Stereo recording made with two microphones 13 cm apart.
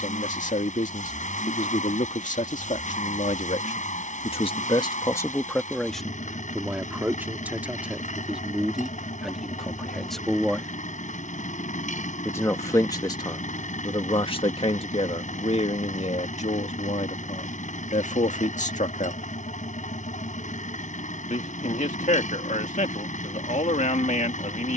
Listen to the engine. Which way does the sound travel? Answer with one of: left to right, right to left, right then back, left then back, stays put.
stays put.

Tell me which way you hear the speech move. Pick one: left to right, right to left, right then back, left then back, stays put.
right then back.